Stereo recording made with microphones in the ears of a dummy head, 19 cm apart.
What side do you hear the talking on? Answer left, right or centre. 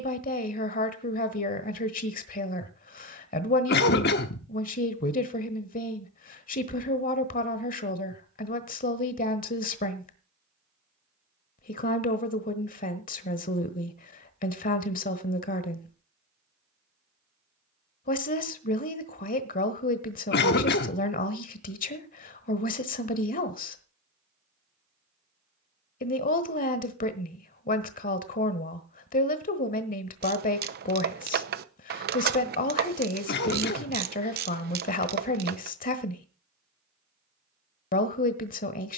left.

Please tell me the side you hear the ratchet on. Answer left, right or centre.
right.